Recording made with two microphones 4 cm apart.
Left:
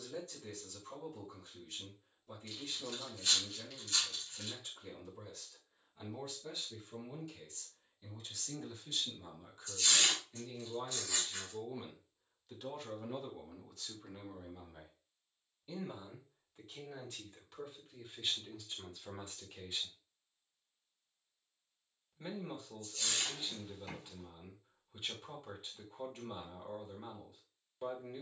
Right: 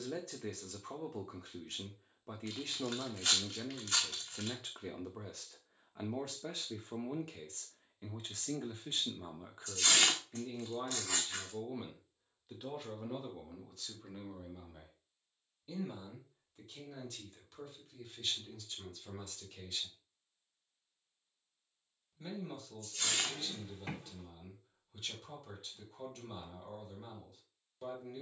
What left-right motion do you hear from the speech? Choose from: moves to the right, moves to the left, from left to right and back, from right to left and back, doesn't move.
moves to the left.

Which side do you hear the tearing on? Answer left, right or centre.
right.